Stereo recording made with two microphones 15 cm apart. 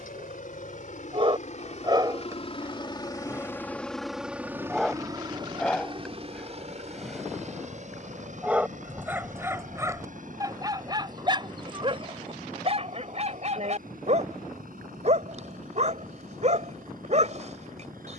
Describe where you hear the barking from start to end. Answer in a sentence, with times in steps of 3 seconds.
You can hear the barking on the right from 0 s, in the centre from 3 s and on the right from 9 s.